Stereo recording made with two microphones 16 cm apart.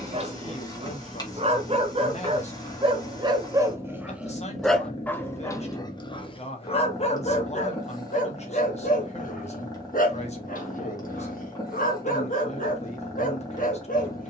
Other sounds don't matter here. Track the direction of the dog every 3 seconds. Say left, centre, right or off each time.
right, centre, left, left, left.